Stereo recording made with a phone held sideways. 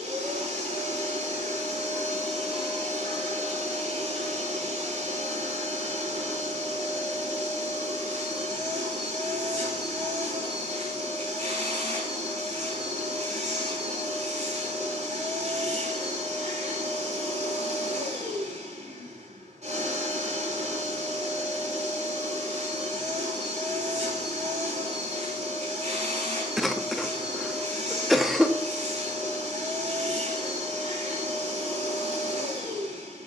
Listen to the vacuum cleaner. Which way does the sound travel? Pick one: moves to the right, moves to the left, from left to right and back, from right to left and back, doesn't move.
doesn't move.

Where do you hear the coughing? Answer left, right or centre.
centre.